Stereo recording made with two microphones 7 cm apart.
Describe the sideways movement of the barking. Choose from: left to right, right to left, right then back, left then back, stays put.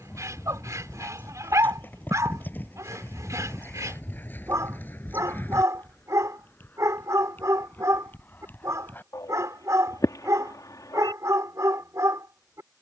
stays put.